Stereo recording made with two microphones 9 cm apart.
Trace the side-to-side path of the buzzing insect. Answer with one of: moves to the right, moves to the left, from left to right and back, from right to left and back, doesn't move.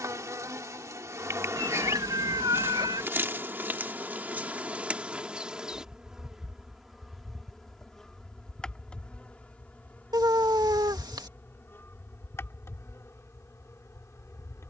moves to the left.